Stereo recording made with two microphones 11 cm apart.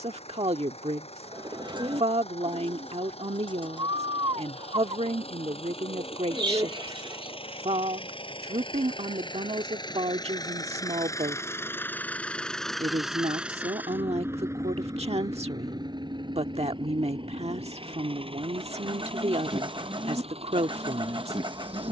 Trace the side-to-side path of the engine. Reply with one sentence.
In this clip you hear the engine move to the right.